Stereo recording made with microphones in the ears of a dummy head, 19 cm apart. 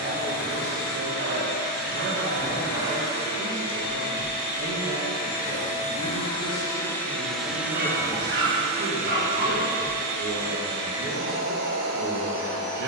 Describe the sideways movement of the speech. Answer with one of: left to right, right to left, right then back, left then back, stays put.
stays put.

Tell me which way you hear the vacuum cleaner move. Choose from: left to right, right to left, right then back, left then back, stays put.
left to right.